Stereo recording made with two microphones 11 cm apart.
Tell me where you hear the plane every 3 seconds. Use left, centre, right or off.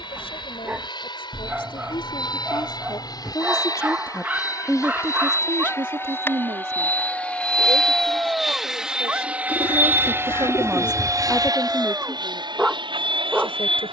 left, left, centre, right, right.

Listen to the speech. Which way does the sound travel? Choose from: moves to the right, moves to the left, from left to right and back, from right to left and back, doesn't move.
from left to right and back.